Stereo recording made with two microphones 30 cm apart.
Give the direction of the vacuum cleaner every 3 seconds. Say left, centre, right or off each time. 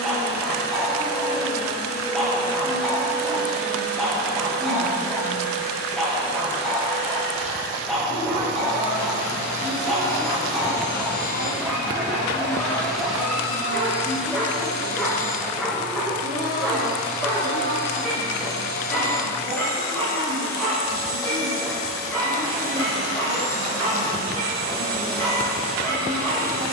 left, left, left, left, centre, right, right, right, right.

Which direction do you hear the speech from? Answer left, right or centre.
right.